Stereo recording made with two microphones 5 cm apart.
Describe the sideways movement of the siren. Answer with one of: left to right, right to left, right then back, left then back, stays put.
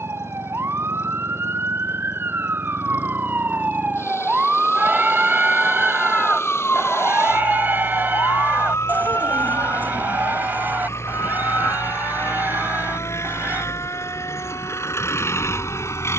right to left.